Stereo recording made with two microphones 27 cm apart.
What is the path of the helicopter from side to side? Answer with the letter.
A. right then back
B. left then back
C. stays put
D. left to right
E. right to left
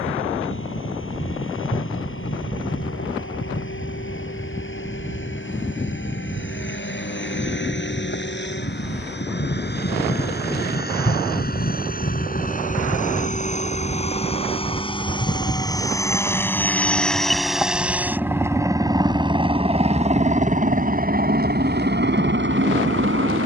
D.